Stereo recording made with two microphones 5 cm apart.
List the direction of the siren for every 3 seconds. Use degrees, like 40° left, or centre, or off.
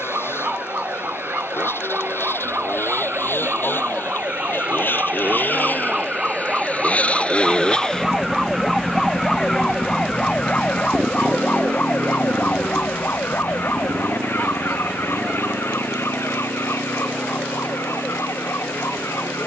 50° right, 40° right, 10° right, 20° left, 50° left, 60° left, 70° left.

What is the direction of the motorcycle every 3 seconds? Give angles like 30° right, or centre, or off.
60° left, 50° left, 20° left, 30° right, 70° right, 80° right, 80° right.